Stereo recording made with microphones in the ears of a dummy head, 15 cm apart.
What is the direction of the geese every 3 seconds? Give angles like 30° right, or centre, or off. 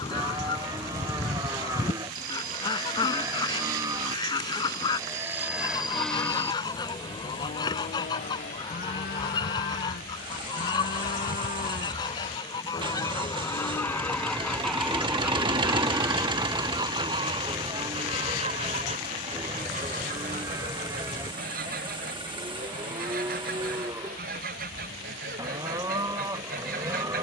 20° left, 20° left, 20° left, 20° left, 10° left, 20° right, 40° right, 50° right, 50° right.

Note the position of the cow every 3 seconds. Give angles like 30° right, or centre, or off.
20° right, 20° right, 30° left, 50° left, 30° left, 10° right, 20° right, 20° right, 20° right.